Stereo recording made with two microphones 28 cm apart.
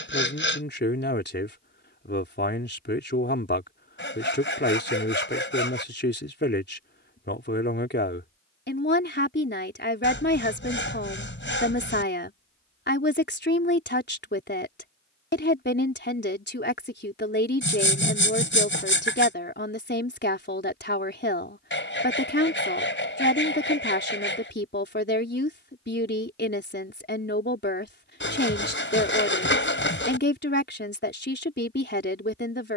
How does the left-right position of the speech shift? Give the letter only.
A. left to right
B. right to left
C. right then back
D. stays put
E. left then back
D.